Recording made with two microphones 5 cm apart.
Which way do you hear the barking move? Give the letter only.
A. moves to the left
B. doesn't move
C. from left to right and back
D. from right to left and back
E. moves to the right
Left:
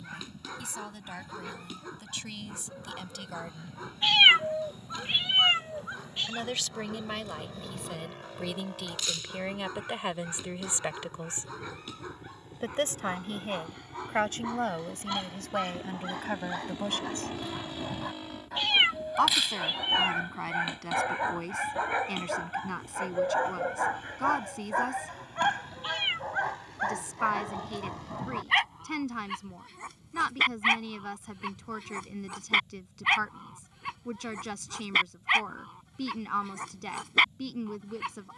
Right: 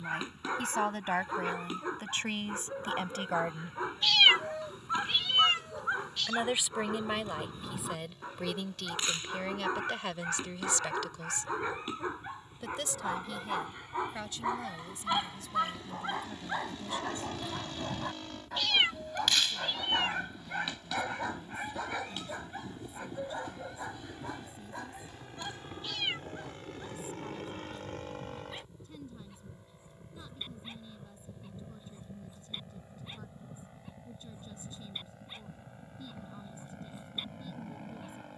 A.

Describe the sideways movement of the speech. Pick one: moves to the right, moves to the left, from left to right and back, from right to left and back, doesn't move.
moves to the left.